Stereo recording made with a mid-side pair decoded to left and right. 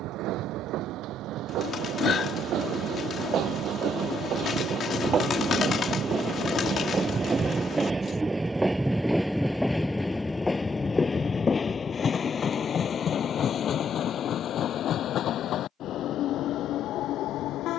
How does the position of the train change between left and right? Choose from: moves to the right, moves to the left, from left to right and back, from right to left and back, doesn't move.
moves to the left.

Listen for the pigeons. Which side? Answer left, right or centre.
left.